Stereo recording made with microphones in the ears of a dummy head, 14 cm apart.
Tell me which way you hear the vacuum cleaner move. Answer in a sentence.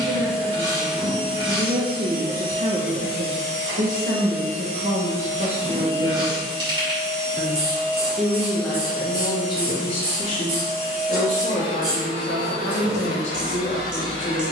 You can hear the vacuum cleaner travel towards the left.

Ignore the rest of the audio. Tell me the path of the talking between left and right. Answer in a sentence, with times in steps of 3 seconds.
In this clip you hear the talking on the right from 0 s, in the centre from 6 s and on the left from 9 s.